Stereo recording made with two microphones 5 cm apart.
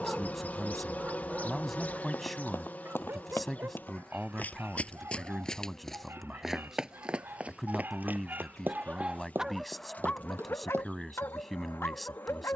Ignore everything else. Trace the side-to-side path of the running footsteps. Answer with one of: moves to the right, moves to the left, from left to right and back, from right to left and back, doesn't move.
moves to the right.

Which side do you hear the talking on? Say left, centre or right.
centre.